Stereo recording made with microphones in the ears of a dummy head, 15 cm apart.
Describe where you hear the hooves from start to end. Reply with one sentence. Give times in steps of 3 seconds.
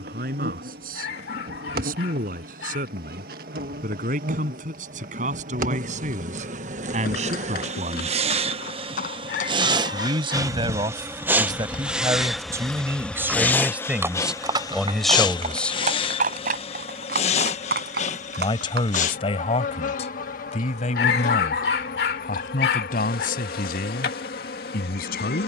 In this clip you hear the hooves not at all from 0 s, on the left from 6 s, in the centre from 12 s, on the right from 15 s and not at all from 21 s.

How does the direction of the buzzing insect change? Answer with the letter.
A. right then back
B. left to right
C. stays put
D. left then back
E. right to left
E.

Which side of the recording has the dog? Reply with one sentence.
In this clip you hear the dog on the left.